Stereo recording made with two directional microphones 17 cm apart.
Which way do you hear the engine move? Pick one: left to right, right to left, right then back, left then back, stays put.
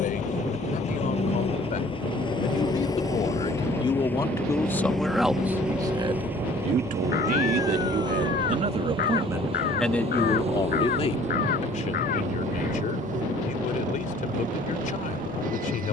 left to right.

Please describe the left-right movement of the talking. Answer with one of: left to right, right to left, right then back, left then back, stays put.
right then back.